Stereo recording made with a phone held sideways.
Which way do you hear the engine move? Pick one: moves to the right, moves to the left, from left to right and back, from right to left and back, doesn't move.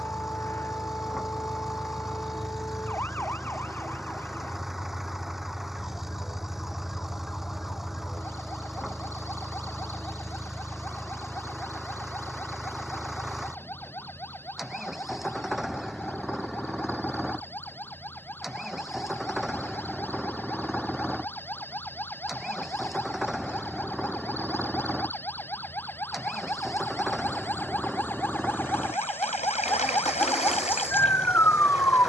doesn't move.